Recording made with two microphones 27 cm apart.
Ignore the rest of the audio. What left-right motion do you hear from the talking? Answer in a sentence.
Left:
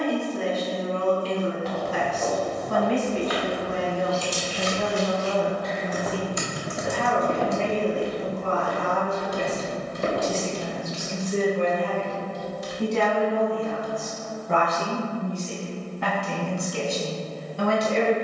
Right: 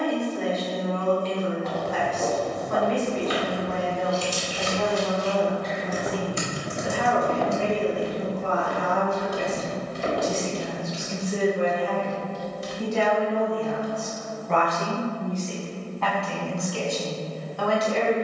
You can hear the talking go right and come back.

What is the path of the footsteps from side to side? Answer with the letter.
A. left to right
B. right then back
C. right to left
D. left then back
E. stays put
C.